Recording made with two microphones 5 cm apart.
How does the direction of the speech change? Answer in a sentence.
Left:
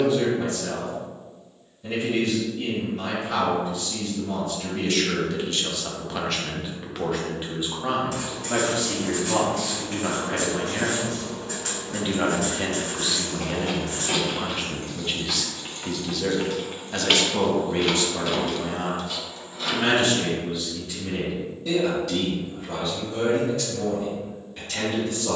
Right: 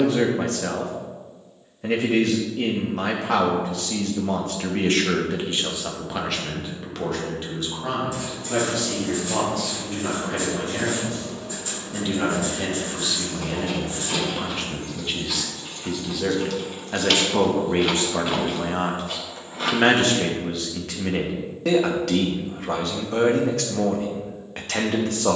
In this clip you hear the speech move from right to left and back again.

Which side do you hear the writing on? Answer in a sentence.
In this clip you hear the writing on the left.